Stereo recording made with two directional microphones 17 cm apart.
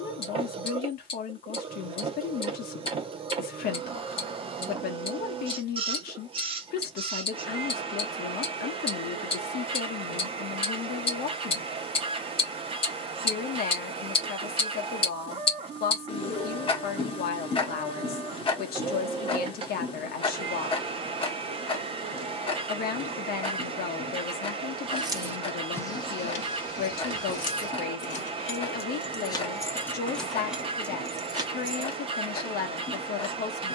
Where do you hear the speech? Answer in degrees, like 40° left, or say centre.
70° left.